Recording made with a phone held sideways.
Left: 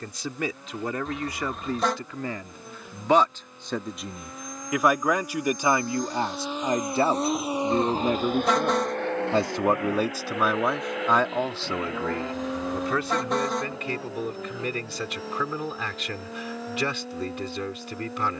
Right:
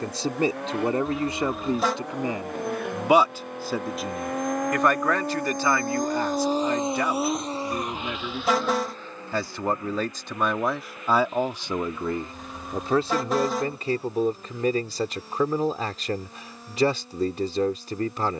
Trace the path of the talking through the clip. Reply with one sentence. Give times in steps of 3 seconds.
In this clip you hear the talking on the right from 0 s, in the centre from 3 s, on the left from 6 s, in the centre from 9 s and on the right from 12 s.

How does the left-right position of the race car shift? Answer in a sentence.
In this clip you hear the race car travel towards the left.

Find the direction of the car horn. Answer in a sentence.
In this clip you hear the car horn in the centre.